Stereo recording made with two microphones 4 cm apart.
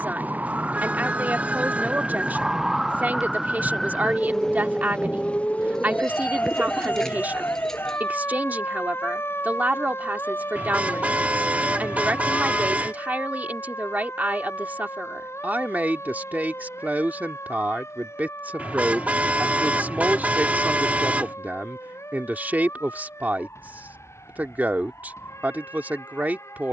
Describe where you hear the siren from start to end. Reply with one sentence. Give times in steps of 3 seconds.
In this clip you hear the siren on the right from 0 s, in the centre from 3 s and on the left from 6 s.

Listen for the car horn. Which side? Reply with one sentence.
In this clip you hear the car horn on the right.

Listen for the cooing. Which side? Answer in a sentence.
You can hear the cooing in the centre.